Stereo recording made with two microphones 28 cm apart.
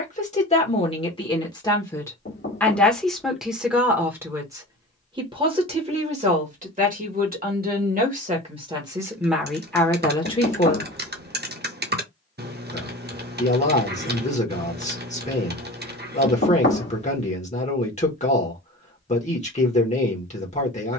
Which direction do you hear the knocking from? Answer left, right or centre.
left.